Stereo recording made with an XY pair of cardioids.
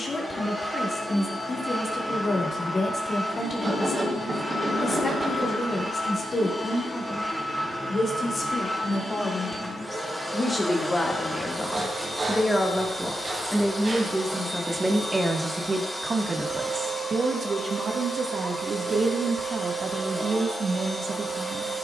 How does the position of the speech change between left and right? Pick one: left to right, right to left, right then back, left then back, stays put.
left to right.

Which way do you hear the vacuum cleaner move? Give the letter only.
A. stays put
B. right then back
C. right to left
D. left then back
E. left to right
A.